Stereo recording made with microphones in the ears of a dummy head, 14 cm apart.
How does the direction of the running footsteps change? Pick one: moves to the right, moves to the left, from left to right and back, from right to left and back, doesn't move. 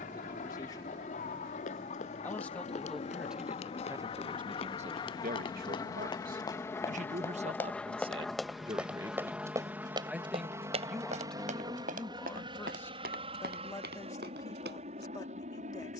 moves to the right.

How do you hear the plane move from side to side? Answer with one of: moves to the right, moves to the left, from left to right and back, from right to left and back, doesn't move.
moves to the right.